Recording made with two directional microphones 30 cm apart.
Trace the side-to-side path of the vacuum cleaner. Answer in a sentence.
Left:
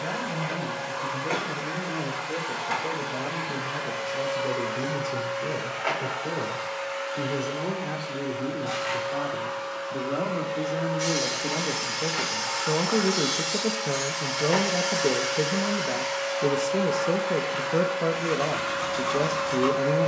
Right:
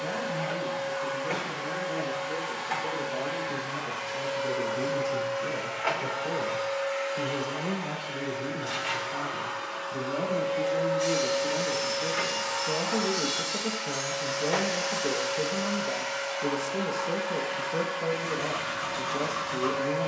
In this clip you hear the vacuum cleaner go right and come back.